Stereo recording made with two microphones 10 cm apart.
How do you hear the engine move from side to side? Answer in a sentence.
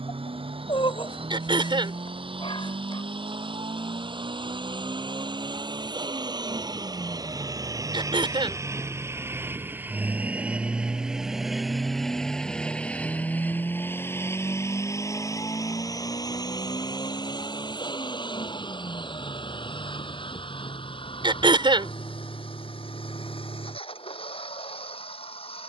In this clip you hear the engine move to the left.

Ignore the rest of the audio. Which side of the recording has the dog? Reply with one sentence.
In this clip you hear the dog on the left.